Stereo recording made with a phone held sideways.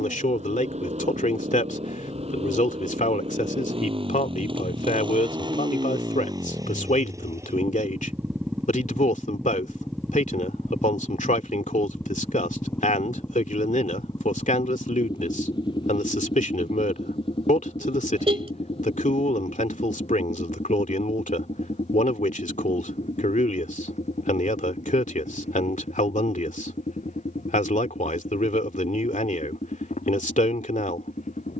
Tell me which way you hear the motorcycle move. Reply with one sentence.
In this clip you hear the motorcycle move from right to left.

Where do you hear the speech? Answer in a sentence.
You can hear the speech on the left.